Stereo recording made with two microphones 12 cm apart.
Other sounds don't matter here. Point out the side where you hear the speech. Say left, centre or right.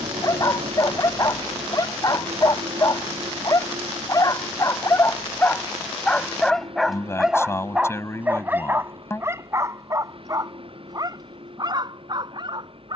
left.